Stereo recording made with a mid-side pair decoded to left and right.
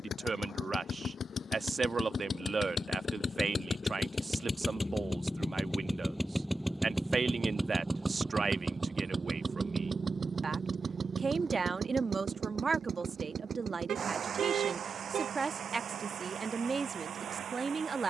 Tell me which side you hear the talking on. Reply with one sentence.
In this clip you hear the talking on the right.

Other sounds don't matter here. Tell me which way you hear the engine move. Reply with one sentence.
You can hear the engine move from left to right.